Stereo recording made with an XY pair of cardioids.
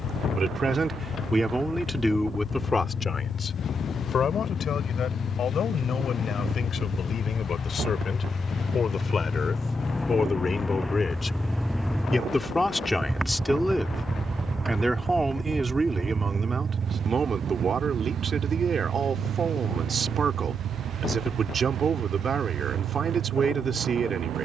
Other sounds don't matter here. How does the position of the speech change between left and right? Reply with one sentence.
You can hear the speech move from right to left and back again.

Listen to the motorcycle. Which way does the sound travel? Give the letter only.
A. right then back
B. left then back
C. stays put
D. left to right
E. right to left
D.